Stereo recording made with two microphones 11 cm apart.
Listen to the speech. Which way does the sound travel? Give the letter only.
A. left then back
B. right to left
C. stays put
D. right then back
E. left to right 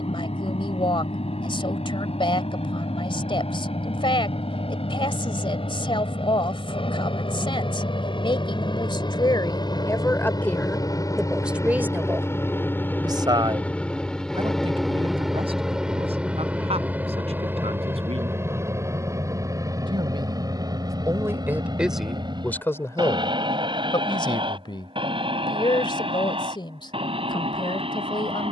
D.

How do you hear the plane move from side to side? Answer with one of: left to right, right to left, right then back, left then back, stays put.
left to right.